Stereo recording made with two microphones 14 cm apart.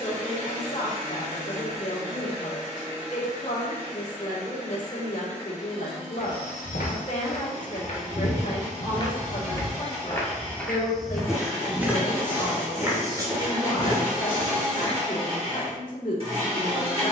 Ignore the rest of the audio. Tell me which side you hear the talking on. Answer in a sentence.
In this clip you hear the talking on the left.